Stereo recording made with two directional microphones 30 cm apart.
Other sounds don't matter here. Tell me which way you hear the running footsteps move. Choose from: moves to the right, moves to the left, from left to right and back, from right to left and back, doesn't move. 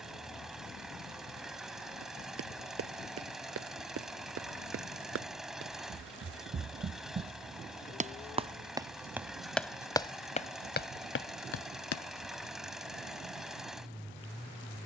moves to the left.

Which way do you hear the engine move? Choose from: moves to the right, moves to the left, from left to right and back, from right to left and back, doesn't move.
doesn't move.